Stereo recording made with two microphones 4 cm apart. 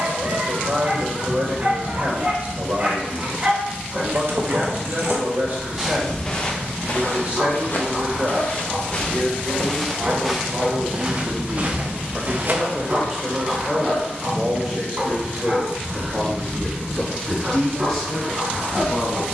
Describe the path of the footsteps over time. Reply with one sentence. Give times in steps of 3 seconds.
You can hear the footsteps not at all from 0 s, on the right from 3 s, on the left from 6 s, in the centre from 9 s, on the right from 12 s and not at all from 15 s.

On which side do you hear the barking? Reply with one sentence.
You can hear the barking on the right.